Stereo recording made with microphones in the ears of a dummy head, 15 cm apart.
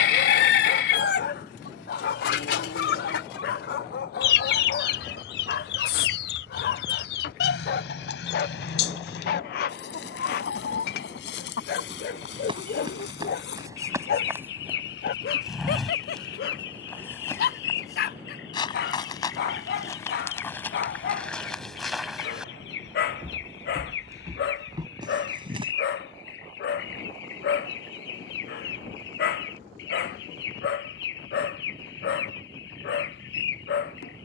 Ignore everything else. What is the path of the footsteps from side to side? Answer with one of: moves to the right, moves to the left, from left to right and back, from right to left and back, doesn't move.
from right to left and back.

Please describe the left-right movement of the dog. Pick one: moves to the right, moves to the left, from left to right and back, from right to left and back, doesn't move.
doesn't move.